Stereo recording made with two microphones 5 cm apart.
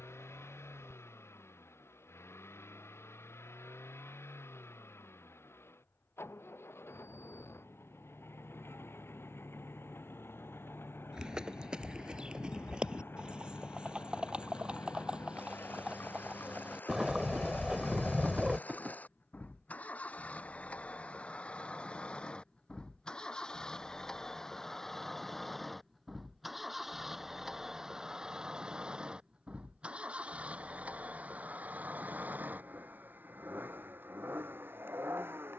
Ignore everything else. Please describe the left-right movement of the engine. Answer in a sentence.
You can hear the engine go from the left side to the right.